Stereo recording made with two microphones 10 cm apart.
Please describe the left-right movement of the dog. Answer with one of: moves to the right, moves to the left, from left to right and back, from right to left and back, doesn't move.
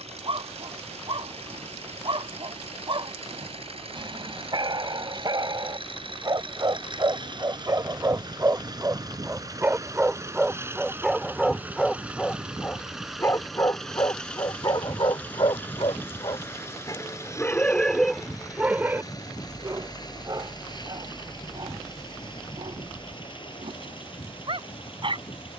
from right to left and back.